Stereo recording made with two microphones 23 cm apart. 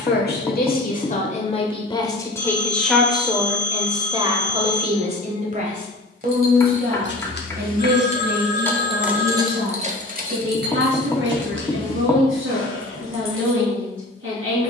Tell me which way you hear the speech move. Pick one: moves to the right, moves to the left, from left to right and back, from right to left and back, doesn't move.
moves to the right.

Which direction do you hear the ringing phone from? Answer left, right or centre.
right.